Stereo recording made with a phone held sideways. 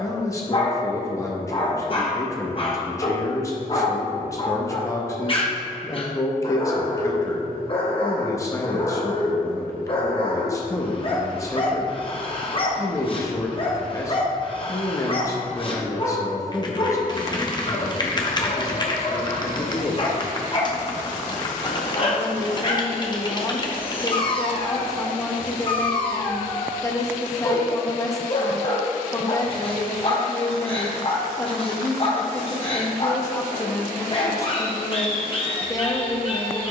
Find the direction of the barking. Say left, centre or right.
left.